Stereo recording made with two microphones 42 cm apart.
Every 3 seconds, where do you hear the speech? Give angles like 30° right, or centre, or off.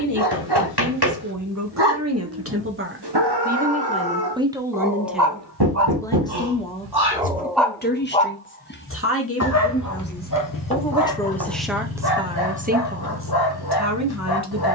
40° right, 10° right, 20° left, 20° left, 30° right.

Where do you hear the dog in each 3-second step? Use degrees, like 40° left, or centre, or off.
60° right, 50° right, 10° left, 50° left, 60° left.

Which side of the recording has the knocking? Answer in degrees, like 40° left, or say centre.
60° right.